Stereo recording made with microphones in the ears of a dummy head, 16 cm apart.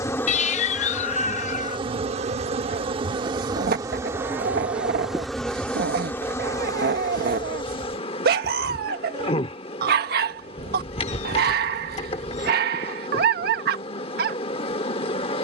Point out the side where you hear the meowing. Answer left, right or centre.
left.